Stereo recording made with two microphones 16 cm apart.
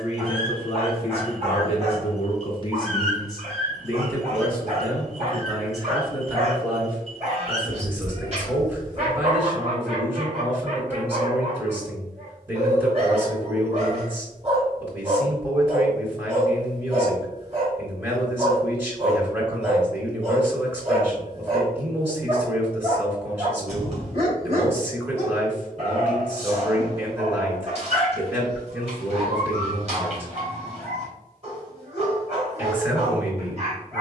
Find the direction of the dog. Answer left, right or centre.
right.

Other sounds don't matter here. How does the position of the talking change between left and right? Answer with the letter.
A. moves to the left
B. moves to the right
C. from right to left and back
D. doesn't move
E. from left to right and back
B.